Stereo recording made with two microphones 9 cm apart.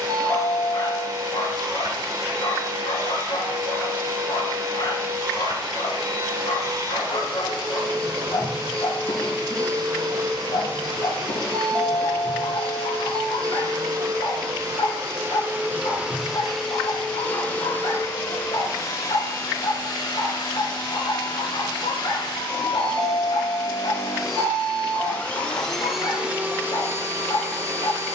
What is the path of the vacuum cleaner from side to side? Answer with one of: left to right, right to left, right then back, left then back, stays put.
left then back.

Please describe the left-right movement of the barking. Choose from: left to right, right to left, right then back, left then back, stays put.
stays put.